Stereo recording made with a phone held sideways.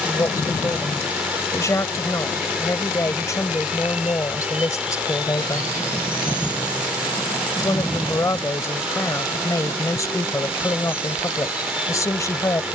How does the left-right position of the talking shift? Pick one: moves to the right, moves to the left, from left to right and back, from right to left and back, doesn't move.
doesn't move.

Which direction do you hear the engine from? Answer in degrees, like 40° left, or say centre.
10° right.